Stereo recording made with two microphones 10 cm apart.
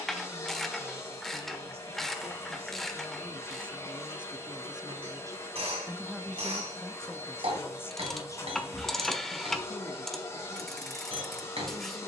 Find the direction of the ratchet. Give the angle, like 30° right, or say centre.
centre.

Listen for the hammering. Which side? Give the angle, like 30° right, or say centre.
70° right.